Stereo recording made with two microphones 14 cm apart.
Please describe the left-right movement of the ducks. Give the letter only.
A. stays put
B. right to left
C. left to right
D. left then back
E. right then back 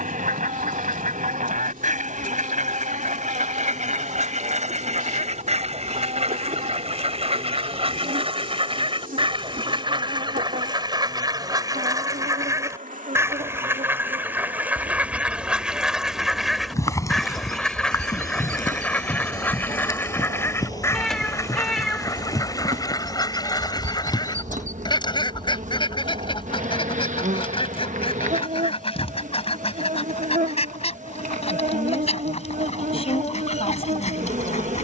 B.